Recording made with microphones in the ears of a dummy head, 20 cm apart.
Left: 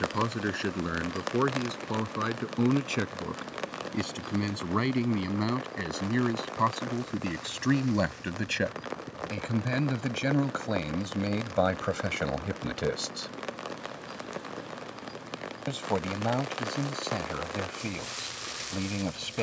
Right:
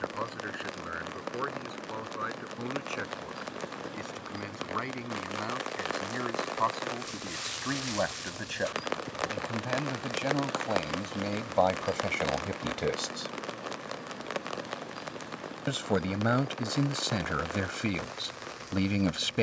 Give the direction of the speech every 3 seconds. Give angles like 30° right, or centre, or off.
60° left, 50° left, 40° left, 20° left, 10° left, 20° right, 20° right.